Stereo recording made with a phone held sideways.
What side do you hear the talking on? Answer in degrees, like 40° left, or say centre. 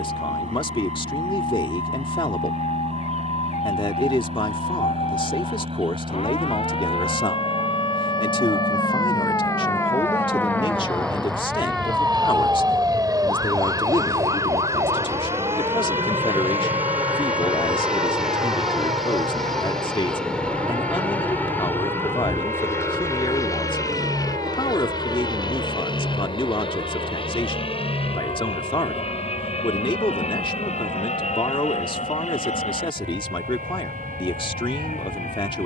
40° left.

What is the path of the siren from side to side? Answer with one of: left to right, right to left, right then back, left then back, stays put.
left to right.